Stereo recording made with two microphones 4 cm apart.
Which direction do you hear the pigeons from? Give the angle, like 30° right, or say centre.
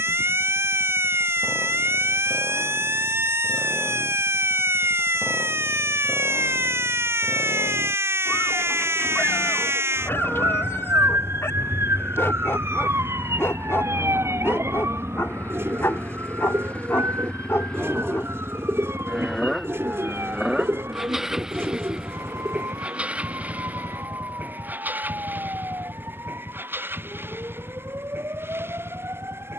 80° right.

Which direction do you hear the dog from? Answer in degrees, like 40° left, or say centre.
70° left.